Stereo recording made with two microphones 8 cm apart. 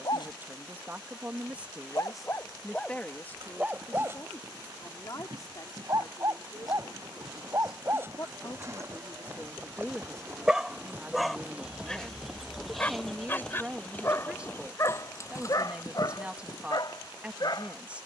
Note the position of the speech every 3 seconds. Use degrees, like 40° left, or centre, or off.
10° right, 40° left, 50° left, centre, 10° right, 10° right.